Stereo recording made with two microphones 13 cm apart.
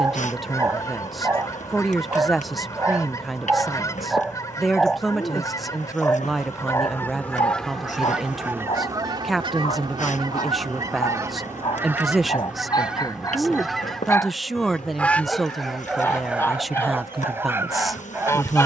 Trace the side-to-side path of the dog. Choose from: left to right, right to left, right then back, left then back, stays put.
left then back.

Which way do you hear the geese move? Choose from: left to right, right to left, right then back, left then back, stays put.
right then back.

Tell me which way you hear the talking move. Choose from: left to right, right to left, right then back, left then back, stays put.
stays put.